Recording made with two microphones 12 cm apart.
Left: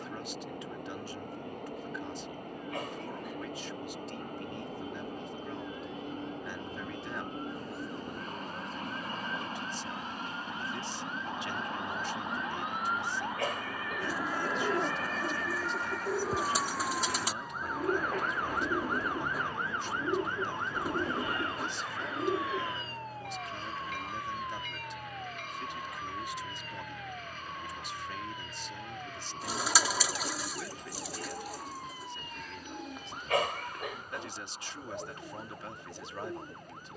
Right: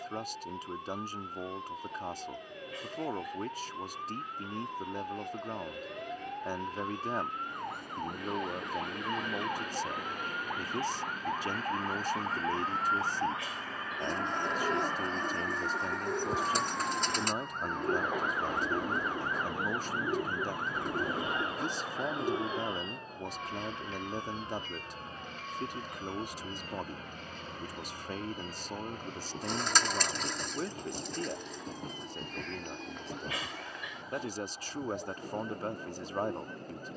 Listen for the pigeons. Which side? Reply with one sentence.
In this clip you hear the pigeons in the centre.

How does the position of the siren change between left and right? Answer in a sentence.
In this clip you hear the siren move from right to left.